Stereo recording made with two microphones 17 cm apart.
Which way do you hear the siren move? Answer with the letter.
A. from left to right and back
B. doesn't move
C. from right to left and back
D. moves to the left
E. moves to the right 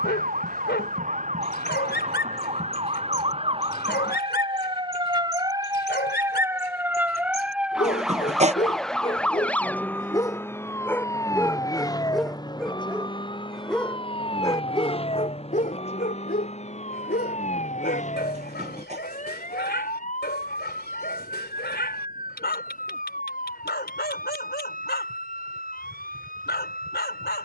D.